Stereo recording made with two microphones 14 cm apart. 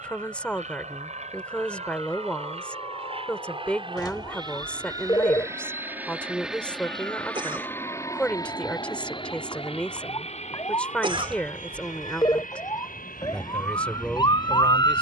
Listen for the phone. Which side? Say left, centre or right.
left.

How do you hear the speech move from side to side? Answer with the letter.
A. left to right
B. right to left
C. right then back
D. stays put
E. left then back
D.